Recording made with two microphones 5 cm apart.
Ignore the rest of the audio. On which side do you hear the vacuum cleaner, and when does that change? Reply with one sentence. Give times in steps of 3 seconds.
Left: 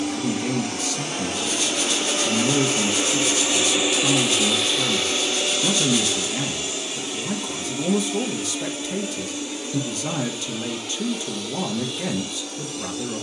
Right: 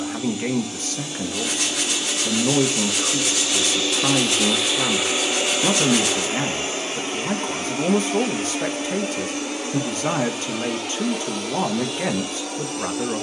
You can hear the vacuum cleaner on the left from 0 s, in the centre from 3 s and on the right from 6 s.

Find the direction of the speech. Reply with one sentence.
In this clip you hear the speech on the right.